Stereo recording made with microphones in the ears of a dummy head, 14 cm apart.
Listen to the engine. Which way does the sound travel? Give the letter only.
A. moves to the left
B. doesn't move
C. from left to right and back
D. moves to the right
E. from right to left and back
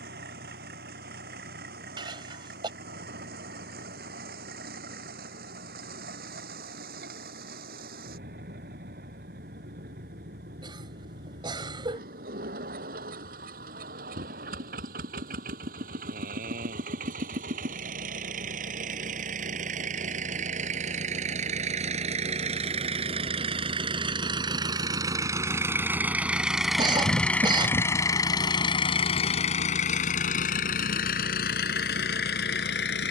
A.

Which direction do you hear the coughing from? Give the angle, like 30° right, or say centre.
30° right.